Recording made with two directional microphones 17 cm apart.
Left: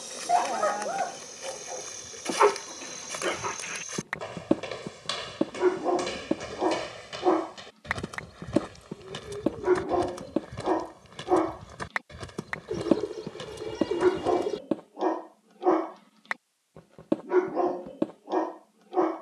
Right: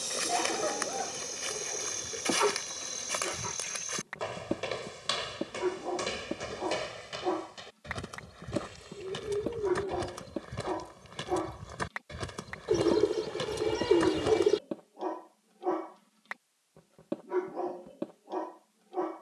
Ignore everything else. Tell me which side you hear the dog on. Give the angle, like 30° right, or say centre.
50° left.